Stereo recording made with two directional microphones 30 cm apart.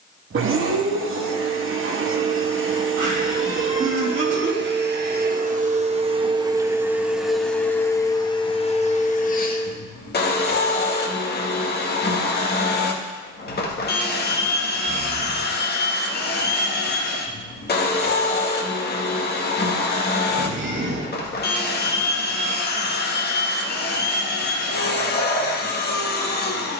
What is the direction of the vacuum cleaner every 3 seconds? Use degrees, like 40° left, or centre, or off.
40° right, 40° right, centre, 30° left, 30° left, 30° left, 30° left, 30° left, 30° left.